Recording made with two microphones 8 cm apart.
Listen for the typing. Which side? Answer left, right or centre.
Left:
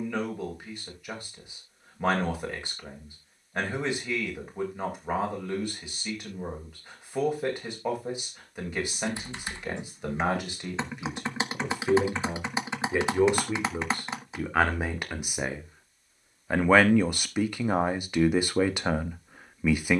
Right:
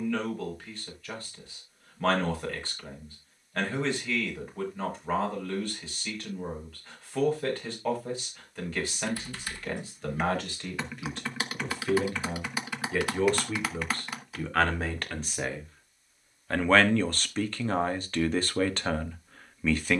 left.